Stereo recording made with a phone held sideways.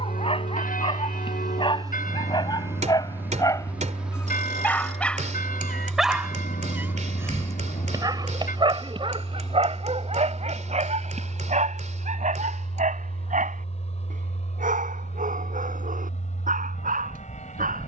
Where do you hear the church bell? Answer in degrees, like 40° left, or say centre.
80° left.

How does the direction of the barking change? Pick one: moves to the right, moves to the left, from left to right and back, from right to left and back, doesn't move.
moves to the right.